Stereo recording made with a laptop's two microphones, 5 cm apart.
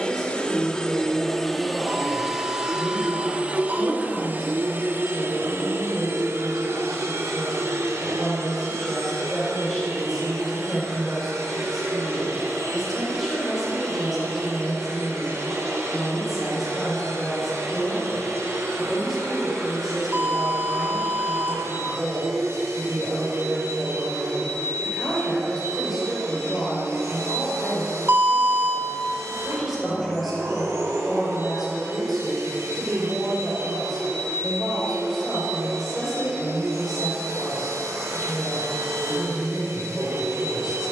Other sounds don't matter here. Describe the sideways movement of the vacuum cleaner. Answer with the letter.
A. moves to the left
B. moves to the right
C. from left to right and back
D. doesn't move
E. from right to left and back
B.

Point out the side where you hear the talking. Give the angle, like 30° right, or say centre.
centre.